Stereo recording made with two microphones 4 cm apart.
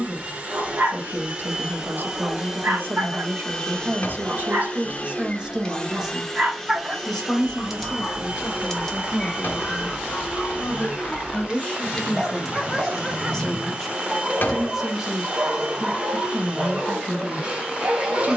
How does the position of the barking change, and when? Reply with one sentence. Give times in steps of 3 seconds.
In this clip you hear the barking on the right from 0 s, in the centre from 6 s, on the left from 9 s, in the centre from 12 s and on the right from 15 s.